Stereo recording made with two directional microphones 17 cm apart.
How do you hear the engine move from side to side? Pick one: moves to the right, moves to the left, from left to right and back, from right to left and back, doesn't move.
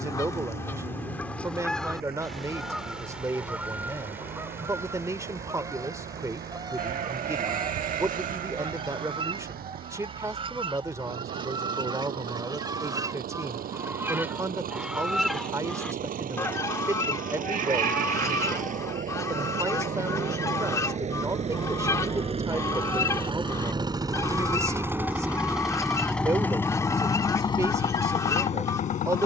moves to the left.